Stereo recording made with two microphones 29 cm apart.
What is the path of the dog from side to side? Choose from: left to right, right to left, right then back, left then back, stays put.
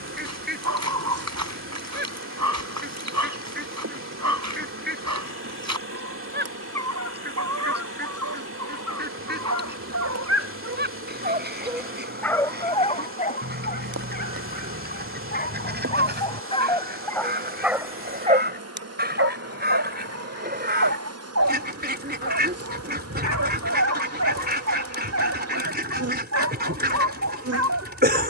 left then back.